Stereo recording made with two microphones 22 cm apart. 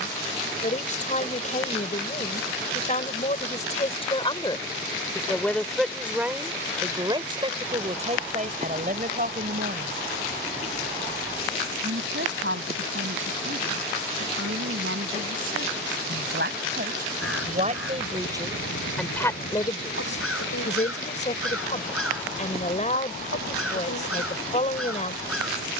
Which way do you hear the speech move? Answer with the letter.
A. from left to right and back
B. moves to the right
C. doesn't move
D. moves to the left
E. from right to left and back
A.